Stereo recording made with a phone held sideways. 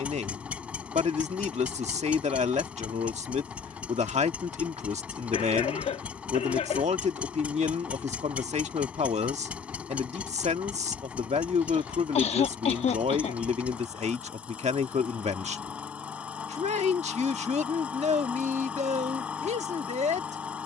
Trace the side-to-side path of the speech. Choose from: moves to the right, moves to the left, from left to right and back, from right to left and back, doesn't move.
doesn't move.